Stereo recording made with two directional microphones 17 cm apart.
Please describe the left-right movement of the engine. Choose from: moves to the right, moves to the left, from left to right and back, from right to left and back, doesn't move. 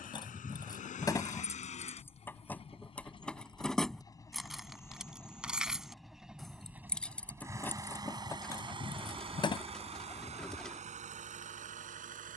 moves to the right.